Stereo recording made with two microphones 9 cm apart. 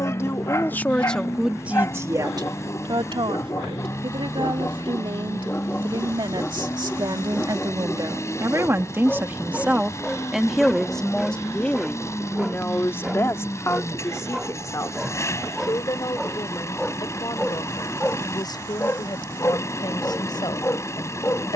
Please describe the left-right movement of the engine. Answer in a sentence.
You can hear the engine stay put.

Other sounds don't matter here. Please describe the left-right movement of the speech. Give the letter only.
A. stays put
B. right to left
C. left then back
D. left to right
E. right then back
E.